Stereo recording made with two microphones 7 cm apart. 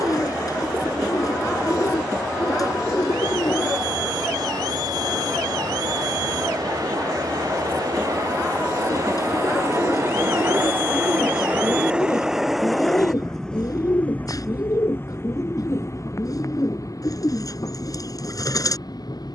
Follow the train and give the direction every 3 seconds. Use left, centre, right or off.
right, right, right, right, centre, left, left.